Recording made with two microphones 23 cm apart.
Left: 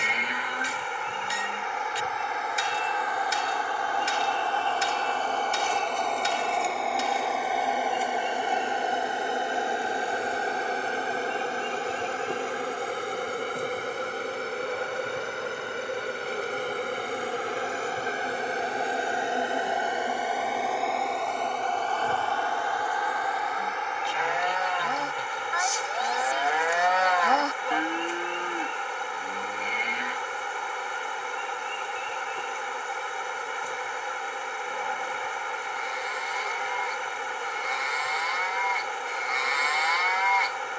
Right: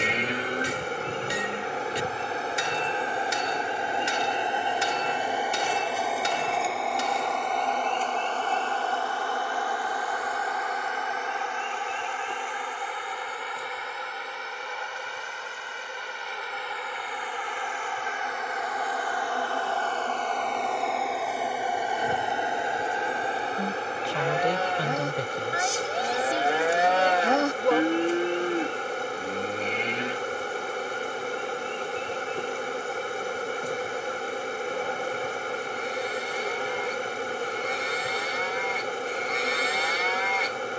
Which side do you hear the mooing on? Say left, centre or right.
right.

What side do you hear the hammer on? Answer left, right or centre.
right.